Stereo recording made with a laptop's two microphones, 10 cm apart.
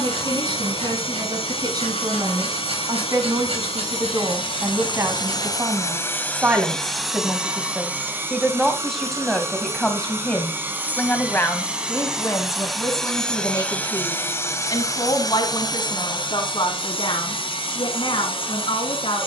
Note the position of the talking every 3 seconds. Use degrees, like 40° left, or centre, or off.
50° right, 30° right, 10° right, 10° left, 40° left, 50° left, 60° left.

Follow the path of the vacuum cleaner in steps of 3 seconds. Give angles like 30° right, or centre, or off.
70° left, 60° left, 10° right, 20° right, 10° left, 50° left, 60° left.